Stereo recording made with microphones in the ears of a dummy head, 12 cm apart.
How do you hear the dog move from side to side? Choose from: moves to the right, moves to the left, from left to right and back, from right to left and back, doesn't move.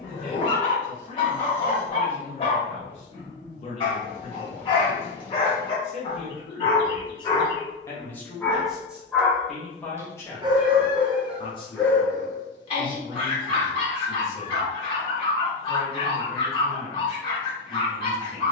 from left to right and back.